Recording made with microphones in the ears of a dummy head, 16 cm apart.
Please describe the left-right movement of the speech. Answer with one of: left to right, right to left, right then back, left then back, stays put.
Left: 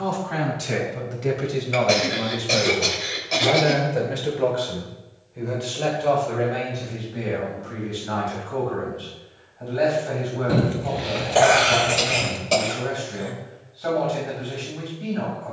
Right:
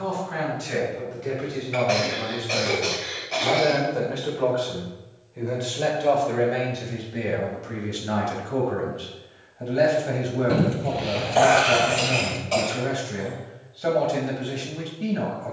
left to right.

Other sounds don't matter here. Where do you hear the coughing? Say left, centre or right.
left.